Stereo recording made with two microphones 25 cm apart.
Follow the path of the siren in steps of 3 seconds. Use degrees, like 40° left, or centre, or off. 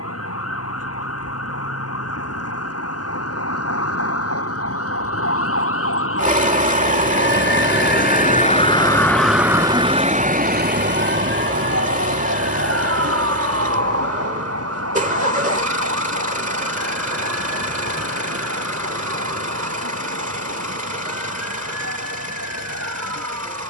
80° left, 70° left, 50° left, 30° right, 70° right, 80° right, 80° right, 80° right.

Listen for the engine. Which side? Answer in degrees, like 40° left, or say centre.
30° right.